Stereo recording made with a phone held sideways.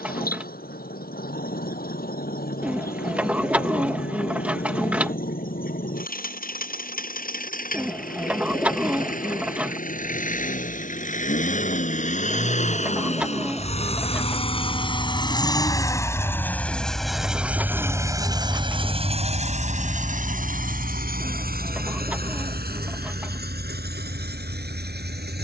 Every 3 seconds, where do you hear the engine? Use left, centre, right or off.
left, left, left, left, left, centre, right, right, right.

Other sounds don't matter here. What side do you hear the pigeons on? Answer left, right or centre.
centre.